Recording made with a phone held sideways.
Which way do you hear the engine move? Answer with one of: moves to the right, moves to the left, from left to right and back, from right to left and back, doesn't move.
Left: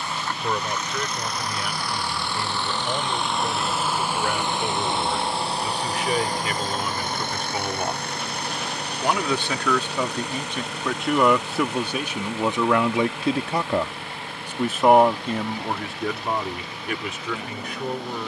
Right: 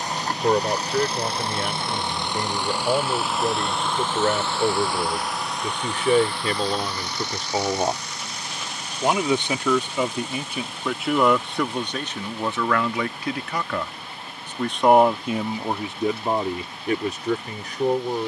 moves to the left.